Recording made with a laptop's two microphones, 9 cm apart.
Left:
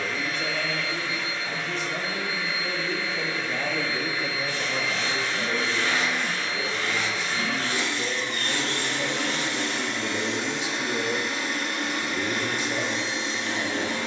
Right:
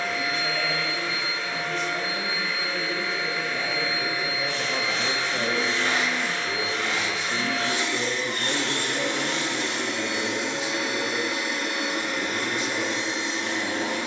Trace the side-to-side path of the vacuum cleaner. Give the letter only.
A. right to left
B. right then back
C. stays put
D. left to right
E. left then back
C.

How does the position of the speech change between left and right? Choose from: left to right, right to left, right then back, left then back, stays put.
right then back.